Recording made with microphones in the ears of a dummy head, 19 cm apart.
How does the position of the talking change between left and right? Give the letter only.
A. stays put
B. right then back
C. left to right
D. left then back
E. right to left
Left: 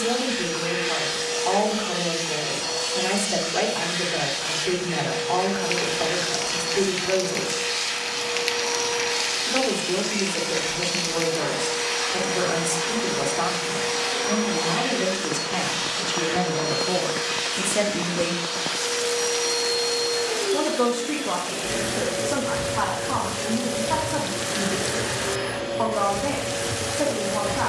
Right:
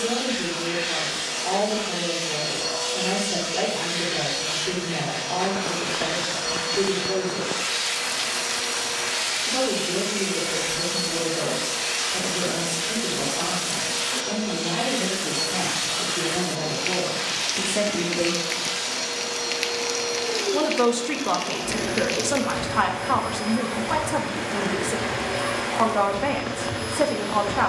C.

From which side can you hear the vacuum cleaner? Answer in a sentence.
In this clip you hear the vacuum cleaner in the centre.